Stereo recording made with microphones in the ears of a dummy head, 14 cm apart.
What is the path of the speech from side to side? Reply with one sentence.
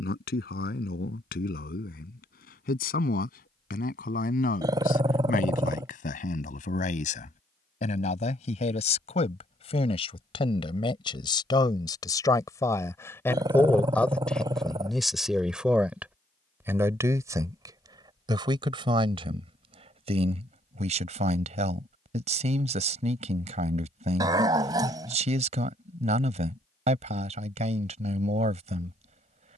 You can hear the speech move from left to right.